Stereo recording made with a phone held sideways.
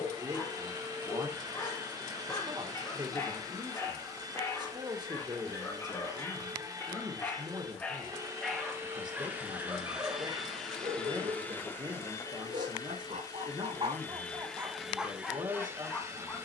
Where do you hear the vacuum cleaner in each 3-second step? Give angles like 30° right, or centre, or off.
30° right, 30° right, 30° right, centre, 20° left, 20° right.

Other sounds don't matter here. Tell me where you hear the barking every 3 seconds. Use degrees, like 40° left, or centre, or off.
20° left, 20° left, 10° left, 30° right, 40° right, 10° left.